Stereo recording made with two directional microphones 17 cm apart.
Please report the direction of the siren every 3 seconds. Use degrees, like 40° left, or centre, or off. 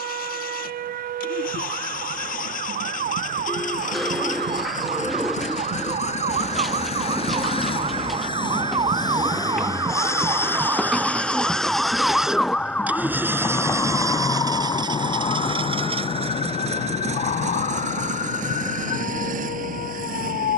60° right, 50° right, 40° right, 20° right, 10° left, 40° left, 50° left.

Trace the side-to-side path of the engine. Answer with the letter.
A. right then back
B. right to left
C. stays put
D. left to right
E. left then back
D.